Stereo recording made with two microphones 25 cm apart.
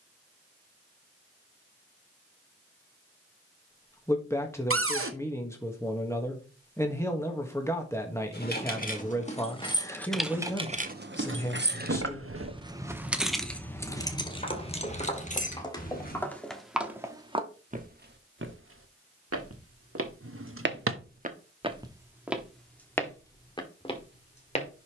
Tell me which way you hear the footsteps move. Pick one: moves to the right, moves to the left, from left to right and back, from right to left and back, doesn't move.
from left to right and back.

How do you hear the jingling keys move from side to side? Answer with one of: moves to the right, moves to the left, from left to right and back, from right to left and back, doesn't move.
from left to right and back.